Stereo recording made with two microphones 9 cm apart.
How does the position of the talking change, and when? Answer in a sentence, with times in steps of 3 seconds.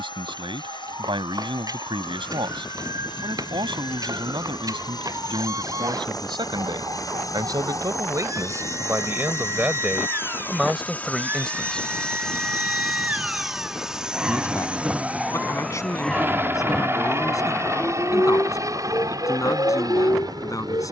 You can hear the talking on the right from 0 s, in the centre from 9 s and on the left from 12 s.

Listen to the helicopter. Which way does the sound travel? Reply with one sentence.
In this clip you hear the helicopter move from left to right.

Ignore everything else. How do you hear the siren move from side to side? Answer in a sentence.
You can hear the siren go from the right side to the left.